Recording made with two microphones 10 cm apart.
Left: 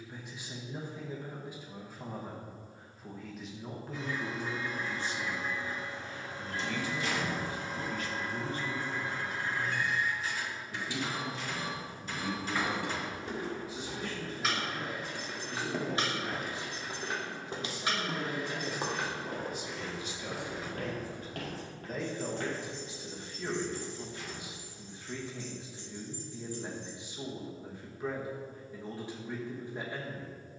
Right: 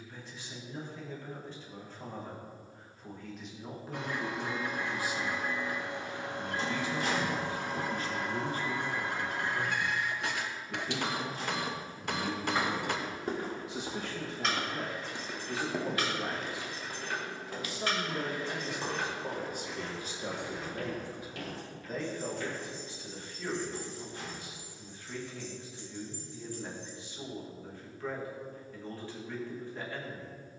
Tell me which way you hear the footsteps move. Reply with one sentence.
In this clip you hear the footsteps go from the right side to the left.